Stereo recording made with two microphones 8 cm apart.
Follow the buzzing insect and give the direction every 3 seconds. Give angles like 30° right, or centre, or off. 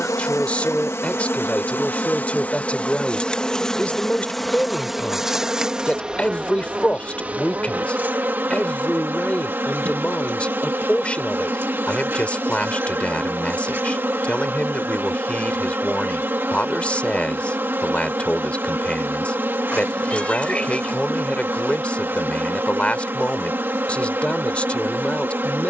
30° left, centre, 20° right, 30° right, 30° right, 30° right, 30° right, 30° right, 30° right.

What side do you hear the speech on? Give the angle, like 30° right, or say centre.
20° left.